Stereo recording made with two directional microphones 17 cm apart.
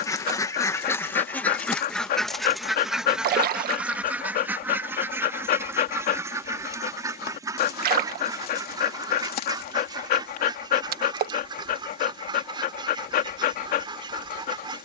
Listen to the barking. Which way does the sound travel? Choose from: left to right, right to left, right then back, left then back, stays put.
stays put.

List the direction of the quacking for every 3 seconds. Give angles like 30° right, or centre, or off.
10° left, 10° right, 20° right, 30° right, 30° right.